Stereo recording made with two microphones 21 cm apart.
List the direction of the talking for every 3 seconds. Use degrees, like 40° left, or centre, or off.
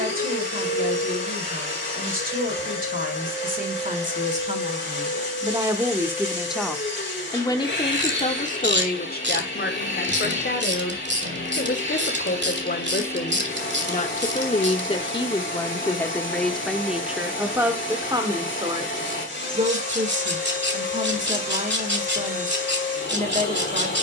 40° right, 30° right, 20° left, 60° left, 40° left, centre, 30° right, 40° right.